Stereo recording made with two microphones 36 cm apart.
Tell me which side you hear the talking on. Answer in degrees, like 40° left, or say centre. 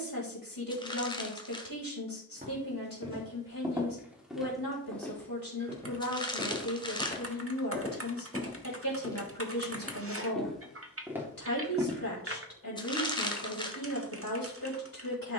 70° left.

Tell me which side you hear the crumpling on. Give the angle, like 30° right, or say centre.
10° left.